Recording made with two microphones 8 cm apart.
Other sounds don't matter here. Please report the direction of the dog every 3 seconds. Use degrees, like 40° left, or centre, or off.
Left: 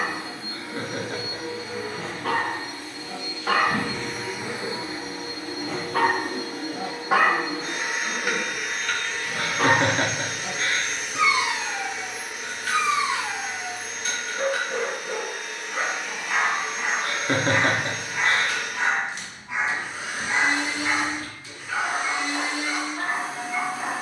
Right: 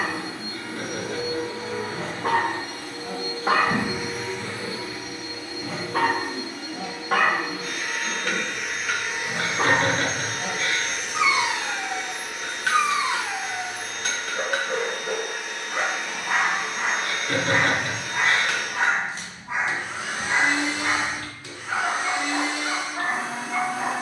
40° right, 20° right, centre, 30° right, 40° right, 40° right, 40° right, 40° right.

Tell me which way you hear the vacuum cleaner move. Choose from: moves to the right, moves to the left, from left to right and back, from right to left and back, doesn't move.
from right to left and back.